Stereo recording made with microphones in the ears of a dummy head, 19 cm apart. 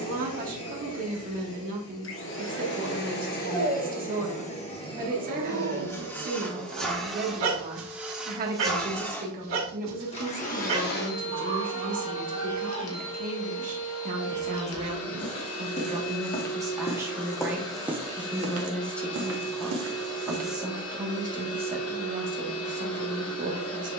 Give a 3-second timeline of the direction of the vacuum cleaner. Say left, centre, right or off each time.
left, left, centre, left, left, left, left, left.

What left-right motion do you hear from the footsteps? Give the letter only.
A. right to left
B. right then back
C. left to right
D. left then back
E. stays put
C.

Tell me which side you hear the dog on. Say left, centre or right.
right.